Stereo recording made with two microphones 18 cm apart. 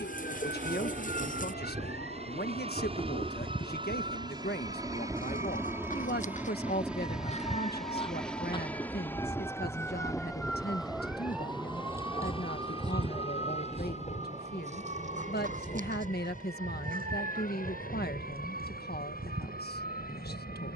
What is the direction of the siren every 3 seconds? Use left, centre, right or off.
left, left, left, centre, right, right, right.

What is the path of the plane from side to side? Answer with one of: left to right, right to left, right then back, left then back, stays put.
right to left.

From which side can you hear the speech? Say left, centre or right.
left.